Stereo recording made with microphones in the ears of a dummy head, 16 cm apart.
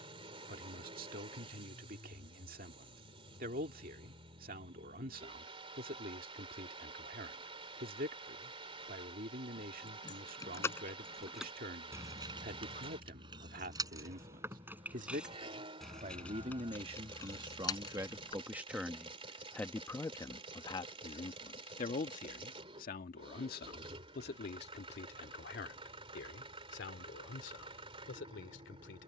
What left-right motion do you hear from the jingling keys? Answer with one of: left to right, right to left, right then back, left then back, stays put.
right then back.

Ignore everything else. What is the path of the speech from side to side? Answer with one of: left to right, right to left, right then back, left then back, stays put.
right to left.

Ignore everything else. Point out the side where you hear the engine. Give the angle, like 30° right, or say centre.
30° right.